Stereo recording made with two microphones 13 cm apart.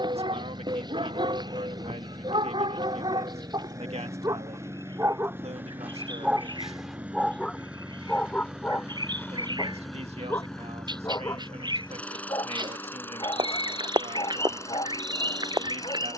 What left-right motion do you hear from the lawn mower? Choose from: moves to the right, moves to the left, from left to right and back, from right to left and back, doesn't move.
moves to the left.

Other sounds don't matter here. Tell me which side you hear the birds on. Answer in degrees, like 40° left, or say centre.
30° right.